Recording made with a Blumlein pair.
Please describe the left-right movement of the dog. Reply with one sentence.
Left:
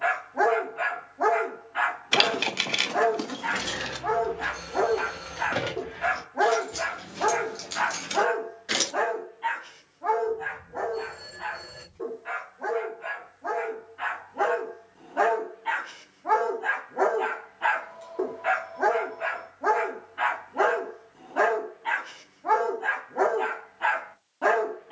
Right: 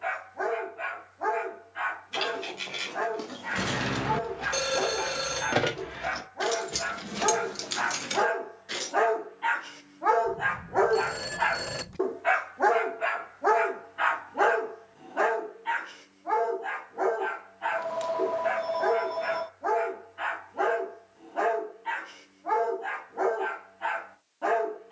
You can hear the dog go right and come back.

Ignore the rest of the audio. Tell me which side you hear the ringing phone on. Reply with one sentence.
In this clip you hear the ringing phone on the right.